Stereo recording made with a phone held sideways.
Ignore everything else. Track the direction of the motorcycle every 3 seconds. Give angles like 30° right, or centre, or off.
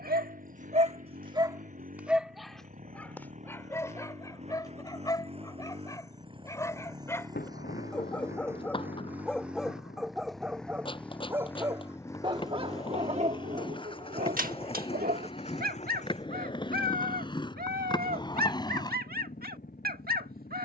50° right, 40° right, 20° right, centre, 30° left, 50° left, 60° left.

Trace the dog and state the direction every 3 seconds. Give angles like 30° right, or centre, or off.
30° right, 20° left, 10° left, 10° right, 50° right, 70° right, 70° right.